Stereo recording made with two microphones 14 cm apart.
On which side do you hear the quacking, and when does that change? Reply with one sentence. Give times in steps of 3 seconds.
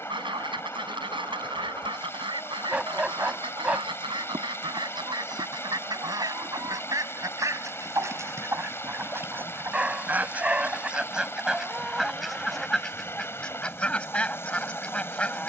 In this clip you hear the quacking on the right from 0 s and in the centre from 9 s.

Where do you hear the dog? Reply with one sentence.
You can hear the dog in the centre.